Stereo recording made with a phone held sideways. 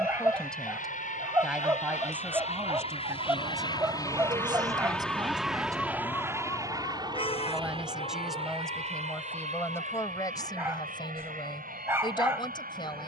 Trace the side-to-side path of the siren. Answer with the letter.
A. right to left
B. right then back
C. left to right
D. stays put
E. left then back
A.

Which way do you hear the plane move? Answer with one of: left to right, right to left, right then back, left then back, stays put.
left to right.